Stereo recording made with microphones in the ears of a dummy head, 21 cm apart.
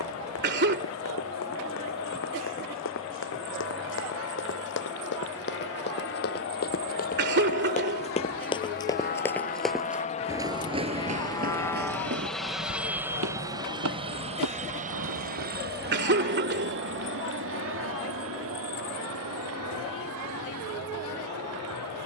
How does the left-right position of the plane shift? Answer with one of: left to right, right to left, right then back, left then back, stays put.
left to right.